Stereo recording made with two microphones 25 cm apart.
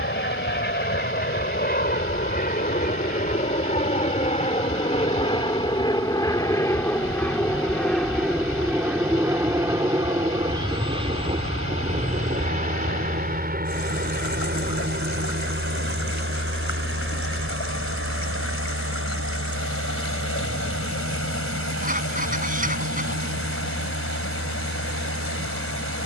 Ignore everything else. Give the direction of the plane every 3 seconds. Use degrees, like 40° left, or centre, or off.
40° left, 30° left, 10° left, 20° right, 30° right, 50° right, 60° right, 60° right, 70° right.